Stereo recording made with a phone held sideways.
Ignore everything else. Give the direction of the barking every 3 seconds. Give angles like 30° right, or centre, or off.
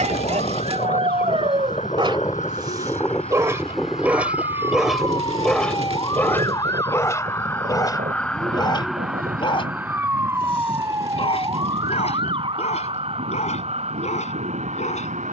40° right, 10° right, 20° left, 40° left, 50° left.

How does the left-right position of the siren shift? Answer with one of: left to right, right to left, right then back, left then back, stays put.
left to right.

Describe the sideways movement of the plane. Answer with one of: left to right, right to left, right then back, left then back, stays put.
left to right.